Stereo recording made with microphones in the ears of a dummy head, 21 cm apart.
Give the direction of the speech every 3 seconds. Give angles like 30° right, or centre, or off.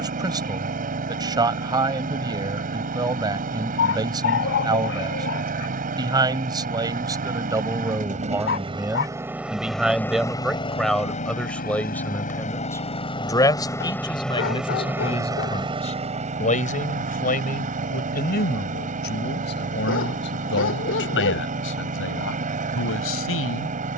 20° right, 20° right, 10° right, centre, 20° left, 30° left, 40° left, 50° left.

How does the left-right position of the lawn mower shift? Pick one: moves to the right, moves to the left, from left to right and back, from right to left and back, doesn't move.
from right to left and back.